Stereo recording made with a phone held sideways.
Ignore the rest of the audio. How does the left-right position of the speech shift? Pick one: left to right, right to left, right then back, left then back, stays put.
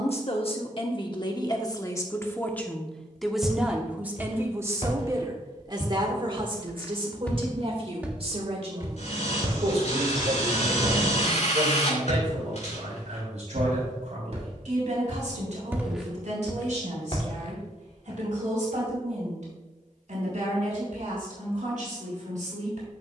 left to right.